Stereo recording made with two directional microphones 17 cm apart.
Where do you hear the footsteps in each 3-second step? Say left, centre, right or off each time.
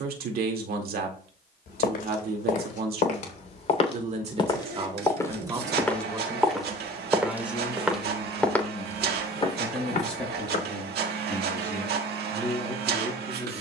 left, left, centre, left, off.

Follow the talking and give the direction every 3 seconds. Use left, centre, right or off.
right, right, centre, centre, centre.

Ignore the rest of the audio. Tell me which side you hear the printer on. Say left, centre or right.
right.